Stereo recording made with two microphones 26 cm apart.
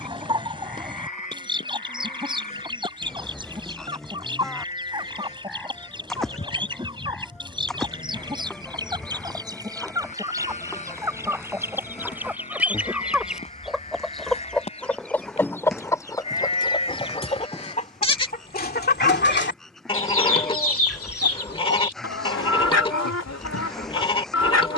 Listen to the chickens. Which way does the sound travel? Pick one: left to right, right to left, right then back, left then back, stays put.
right to left.